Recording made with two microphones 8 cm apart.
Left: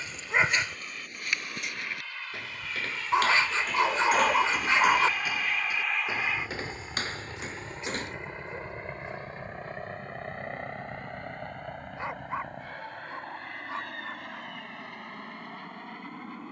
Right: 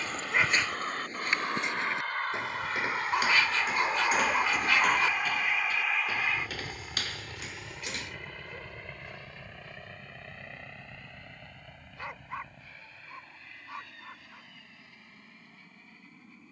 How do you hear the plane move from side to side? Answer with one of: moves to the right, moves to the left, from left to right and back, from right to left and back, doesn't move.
moves to the left.